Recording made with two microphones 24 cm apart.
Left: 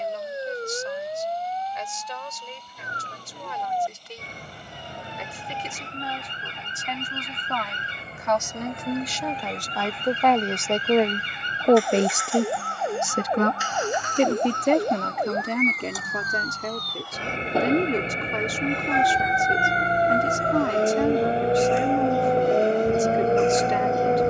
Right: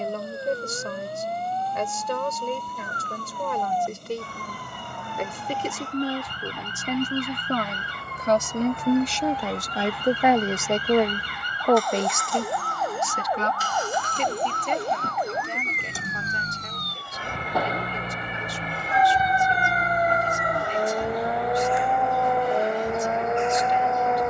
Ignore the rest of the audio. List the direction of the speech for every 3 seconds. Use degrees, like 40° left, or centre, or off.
60° right, 60° right, 40° right, 10° right, 50° left, 80° left, 80° left, 80° left.